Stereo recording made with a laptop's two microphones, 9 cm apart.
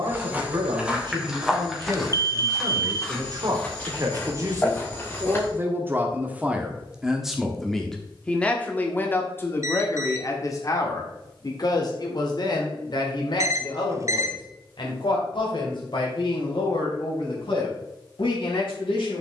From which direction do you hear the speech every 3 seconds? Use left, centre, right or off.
right, right, centre, left, left, left, left.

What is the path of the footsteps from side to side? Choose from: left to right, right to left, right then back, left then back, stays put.
right to left.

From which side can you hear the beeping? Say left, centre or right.
right.